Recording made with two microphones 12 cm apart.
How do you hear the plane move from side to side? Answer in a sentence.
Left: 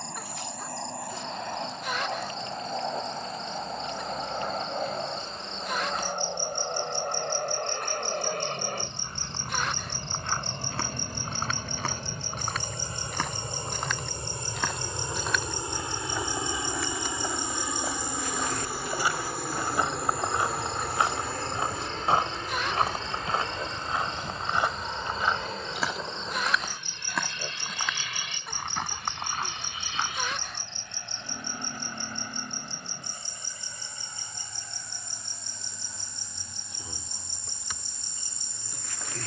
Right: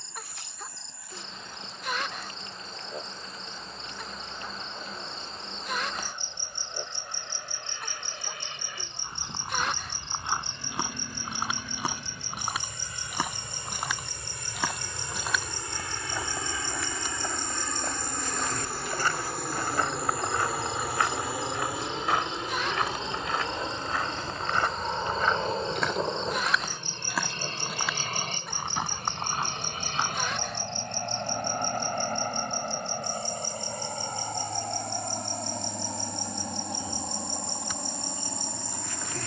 You can hear the plane travel towards the right.